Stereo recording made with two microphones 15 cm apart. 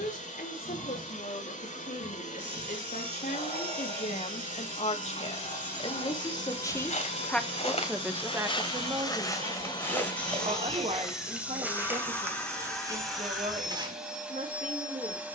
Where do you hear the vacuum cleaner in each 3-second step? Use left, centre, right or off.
left, left, left, left, centre.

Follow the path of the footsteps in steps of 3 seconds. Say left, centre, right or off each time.
off, off, left, centre, right.